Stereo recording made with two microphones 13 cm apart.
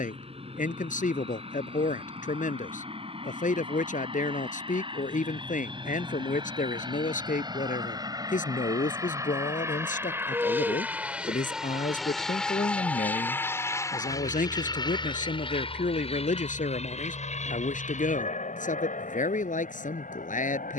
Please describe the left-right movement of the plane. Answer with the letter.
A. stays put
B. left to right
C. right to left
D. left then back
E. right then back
C.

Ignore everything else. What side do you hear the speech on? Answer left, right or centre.
left.